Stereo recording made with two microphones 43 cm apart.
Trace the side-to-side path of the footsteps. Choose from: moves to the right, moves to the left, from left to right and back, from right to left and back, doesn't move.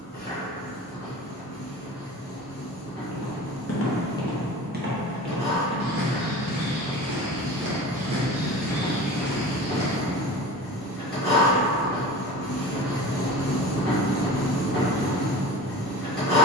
from left to right and back.